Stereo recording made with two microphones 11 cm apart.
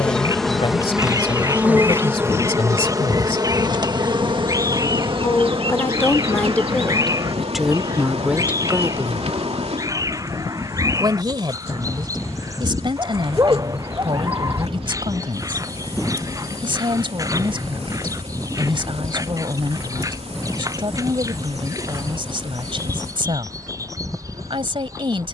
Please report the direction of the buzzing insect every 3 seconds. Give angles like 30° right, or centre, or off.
10° right, 50° right, 70° right, 70° right, 70° right, 70° right, 70° right, 70° right, 70° right.